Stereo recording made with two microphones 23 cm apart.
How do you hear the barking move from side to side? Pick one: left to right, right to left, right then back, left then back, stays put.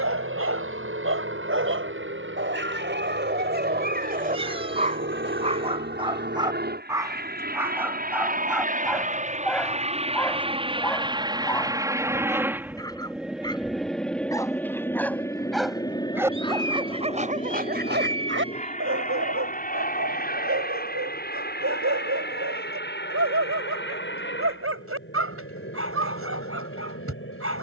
left then back.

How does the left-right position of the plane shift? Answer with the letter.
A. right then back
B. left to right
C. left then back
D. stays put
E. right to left
E.